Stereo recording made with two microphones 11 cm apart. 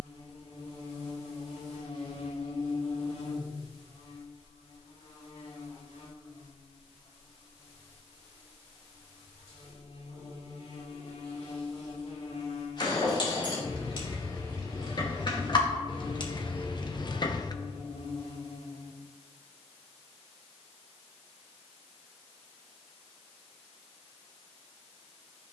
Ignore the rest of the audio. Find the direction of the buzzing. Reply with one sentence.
In this clip you hear the buzzing on the left.